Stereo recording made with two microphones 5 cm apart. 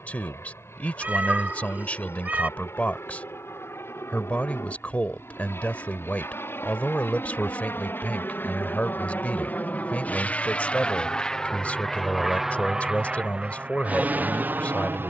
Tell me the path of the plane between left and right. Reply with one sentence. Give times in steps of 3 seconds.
In this clip you hear the plane on the left from 0 s and on the right from 12 s.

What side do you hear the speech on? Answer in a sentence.
You can hear the speech on the left.